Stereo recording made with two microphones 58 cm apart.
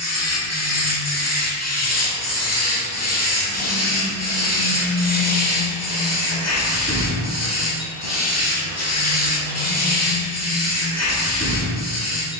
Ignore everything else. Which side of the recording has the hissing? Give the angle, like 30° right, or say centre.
20° left.